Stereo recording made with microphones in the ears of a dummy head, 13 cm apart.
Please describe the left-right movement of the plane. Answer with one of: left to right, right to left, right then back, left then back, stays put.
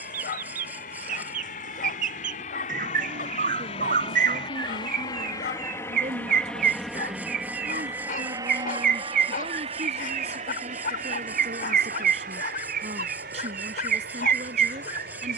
left to right.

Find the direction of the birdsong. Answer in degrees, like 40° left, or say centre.
60° right.